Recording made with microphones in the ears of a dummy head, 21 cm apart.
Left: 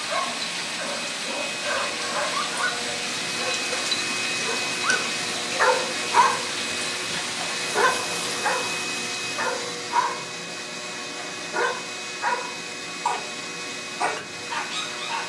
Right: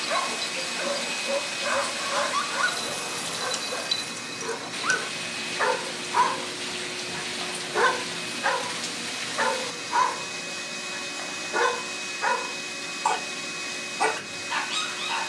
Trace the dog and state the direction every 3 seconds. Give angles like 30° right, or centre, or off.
20° right, centre, centre, 20° right, 20° right.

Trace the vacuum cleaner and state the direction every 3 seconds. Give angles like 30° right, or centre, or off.
10° right, 30° left, 50° left, centre, 10° right.